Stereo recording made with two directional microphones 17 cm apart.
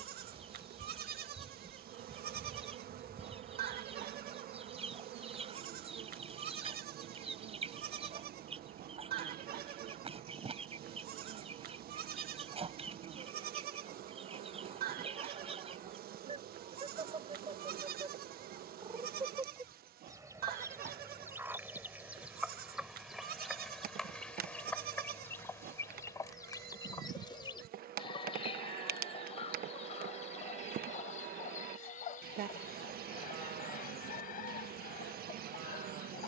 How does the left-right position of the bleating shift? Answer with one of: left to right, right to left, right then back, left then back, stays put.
stays put.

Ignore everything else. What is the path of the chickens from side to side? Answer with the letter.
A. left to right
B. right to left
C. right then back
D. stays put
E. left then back
B.